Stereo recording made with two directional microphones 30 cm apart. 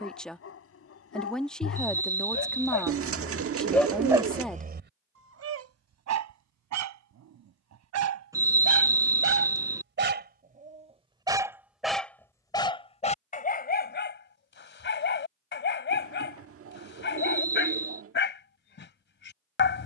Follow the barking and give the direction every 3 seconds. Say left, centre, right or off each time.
left, right, right, right, left, left, left.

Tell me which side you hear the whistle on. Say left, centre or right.
centre.